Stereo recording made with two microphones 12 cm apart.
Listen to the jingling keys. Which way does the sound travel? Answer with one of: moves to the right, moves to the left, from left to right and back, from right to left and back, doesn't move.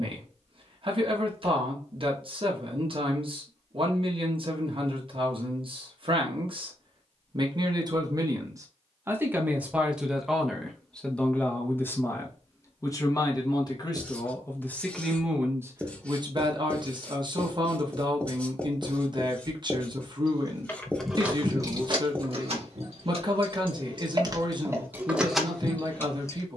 from left to right and back.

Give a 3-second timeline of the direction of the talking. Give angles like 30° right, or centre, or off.
50° right, 50° right, 40° right, centre, 20° left, 30° right, 40° right, 40° right, 40° right.